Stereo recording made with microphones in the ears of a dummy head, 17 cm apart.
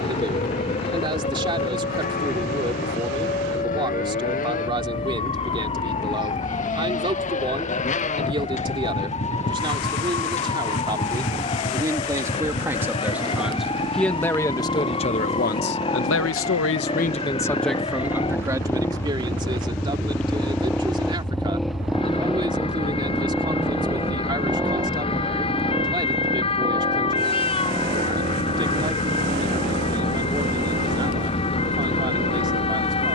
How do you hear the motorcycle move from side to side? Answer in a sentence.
In this clip you hear the motorcycle travel towards the right.